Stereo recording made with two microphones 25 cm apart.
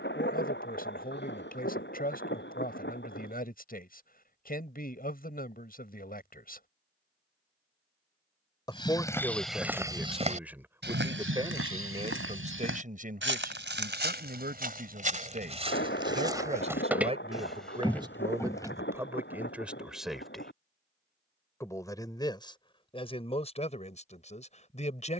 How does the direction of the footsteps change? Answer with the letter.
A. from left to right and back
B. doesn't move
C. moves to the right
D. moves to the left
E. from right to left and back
A.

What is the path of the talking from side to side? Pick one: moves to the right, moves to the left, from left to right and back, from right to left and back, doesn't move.
from left to right and back.